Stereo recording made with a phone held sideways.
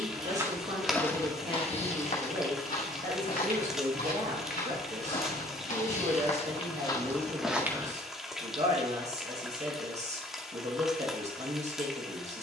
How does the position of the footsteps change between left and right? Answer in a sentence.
In this clip you hear the footsteps move from right to left and back again.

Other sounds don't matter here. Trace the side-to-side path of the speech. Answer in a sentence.
In this clip you hear the speech stay put.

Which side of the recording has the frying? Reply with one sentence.
In this clip you hear the frying in the centre.